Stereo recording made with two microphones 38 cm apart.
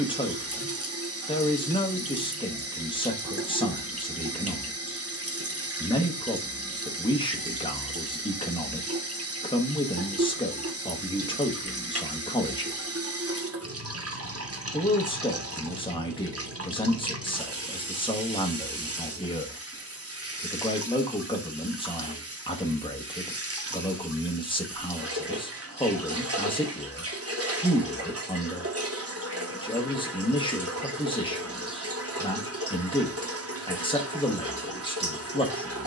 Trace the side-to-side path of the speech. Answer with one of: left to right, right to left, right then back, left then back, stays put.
stays put.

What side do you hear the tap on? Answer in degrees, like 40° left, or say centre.
40° right.